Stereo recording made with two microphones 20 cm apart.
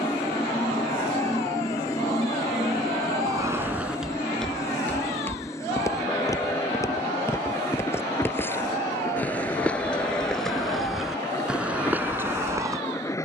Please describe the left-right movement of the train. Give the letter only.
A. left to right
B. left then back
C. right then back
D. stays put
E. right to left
D.